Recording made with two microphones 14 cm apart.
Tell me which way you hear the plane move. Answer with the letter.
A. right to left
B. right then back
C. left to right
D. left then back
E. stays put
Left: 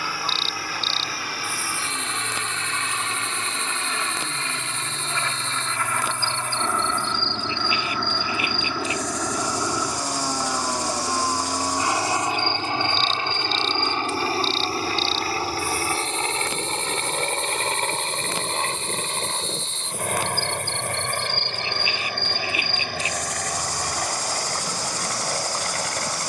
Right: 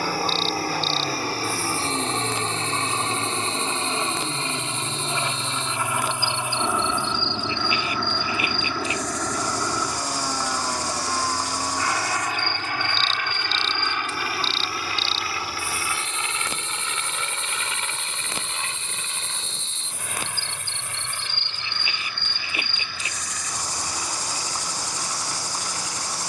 A.